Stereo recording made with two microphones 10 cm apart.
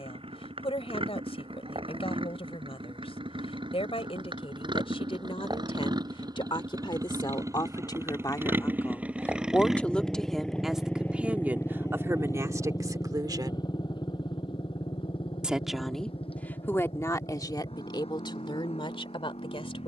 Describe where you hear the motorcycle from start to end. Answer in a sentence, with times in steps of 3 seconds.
You can hear the motorcycle on the right from 0 s, in the centre from 9 s and on the left from 12 s.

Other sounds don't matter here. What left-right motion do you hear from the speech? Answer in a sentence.
In this clip you hear the speech move from left to right and back again.